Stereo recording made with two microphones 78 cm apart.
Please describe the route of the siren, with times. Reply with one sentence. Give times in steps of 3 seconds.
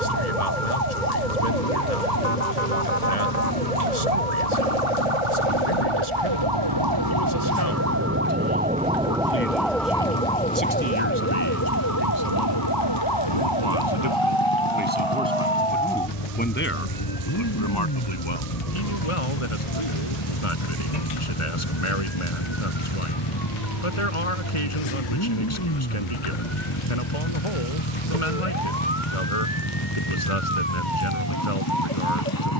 You can hear the siren on the right from 0 s, in the centre from 9 s and on the left from 12 s.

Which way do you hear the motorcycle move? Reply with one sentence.
You can hear the motorcycle stay in one place.